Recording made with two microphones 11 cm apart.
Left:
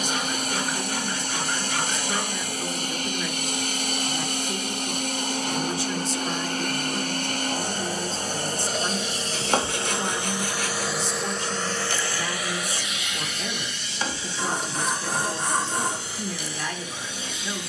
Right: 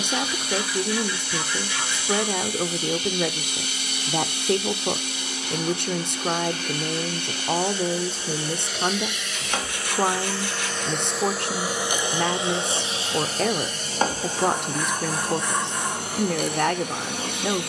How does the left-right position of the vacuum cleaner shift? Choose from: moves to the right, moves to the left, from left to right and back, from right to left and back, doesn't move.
moves to the right.